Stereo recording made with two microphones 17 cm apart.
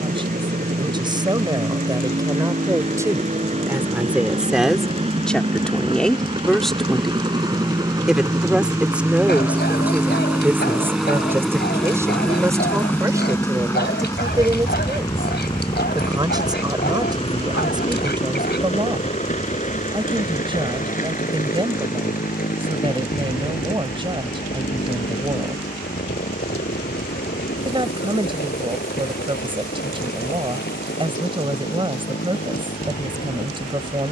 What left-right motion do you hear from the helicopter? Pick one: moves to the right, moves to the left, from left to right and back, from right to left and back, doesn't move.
moves to the left.